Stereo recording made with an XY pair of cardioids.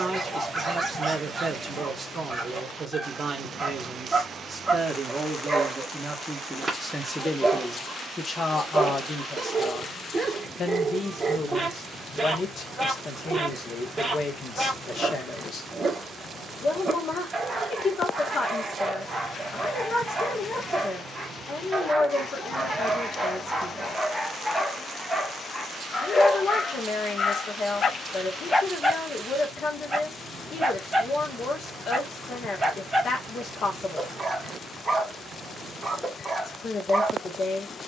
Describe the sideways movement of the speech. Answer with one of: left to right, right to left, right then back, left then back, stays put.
right to left.